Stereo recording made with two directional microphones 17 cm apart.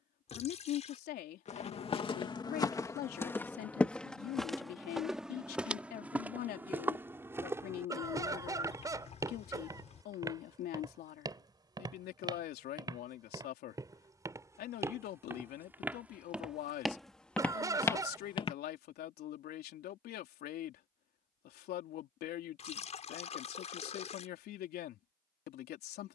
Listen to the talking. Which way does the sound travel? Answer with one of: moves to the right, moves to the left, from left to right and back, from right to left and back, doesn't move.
doesn't move.